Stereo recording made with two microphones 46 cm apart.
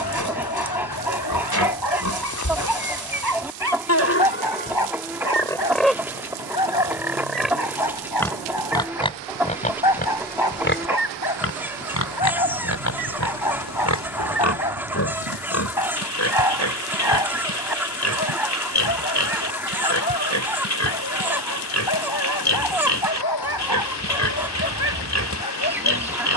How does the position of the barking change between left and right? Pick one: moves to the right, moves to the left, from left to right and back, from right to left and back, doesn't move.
doesn't move.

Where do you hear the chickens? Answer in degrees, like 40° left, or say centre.
centre.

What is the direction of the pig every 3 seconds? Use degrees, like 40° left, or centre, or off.
40° left, 20° left, centre, 20° left, 40° left, 40° left, 40° left, 40° left, 40° left.